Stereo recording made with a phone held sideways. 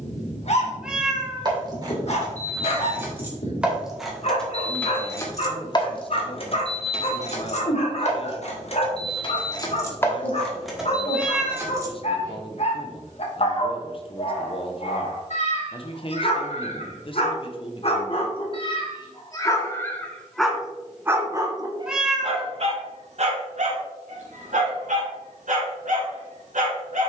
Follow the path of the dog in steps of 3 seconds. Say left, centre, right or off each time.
left, left, left, left, left, left, left, right, right.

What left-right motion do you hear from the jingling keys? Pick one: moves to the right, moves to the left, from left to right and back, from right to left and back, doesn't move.
from right to left and back.